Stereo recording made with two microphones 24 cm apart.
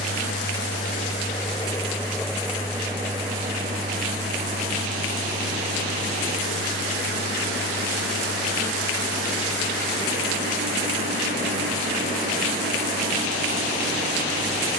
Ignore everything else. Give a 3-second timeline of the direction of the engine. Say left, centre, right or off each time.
left, right, right, right, right.